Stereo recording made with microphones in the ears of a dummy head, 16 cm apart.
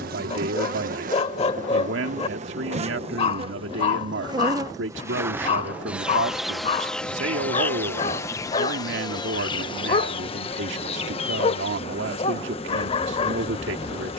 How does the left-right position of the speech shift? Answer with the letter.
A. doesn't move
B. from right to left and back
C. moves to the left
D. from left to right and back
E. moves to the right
A.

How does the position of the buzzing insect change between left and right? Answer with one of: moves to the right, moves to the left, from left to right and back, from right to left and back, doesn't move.
moves to the left.